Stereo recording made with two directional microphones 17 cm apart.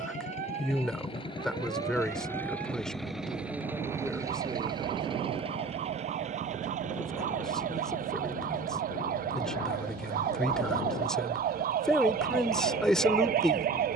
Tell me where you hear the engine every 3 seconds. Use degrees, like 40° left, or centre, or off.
30° left, 20° right, 50° right, 60° right, 70° right.